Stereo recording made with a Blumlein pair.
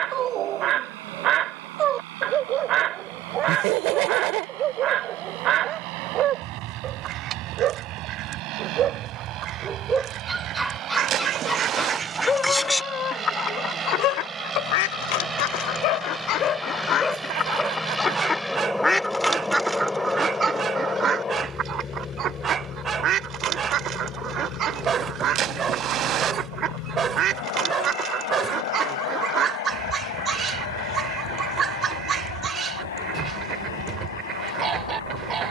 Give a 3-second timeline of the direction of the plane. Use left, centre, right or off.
right, right, right, right, right, centre, centre, left, left, left, left, left.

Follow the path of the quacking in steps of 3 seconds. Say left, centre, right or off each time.
right, right, right, right, left, left, centre, right, right, right, right, right.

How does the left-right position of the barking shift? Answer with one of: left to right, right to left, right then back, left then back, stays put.
left then back.